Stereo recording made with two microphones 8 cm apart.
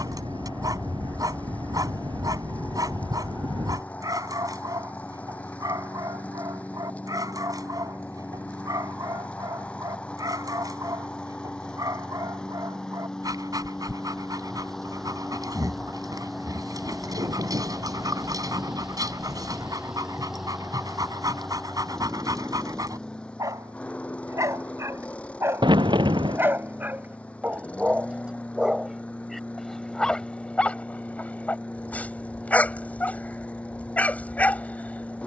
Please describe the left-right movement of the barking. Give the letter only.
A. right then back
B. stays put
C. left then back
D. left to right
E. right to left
E.